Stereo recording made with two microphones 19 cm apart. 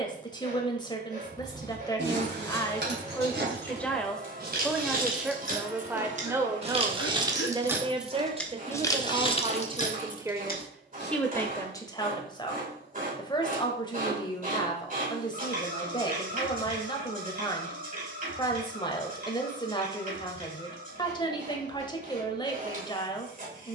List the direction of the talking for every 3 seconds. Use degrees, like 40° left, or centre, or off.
20° left, centre, 20° right, 10° right, 20° left, 20° left, 20° left, 20° left.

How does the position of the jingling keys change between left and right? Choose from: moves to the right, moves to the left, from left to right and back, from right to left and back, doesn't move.
moves to the left.